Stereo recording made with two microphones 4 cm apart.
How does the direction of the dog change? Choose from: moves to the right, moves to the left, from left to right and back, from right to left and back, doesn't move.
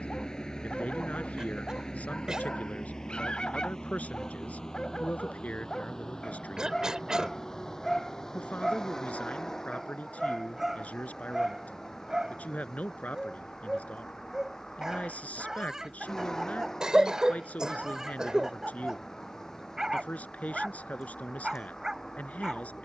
moves to the right.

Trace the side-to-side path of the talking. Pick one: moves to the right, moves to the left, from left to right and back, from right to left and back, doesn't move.
doesn't move.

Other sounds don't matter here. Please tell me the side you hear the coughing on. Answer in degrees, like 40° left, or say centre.
20° right.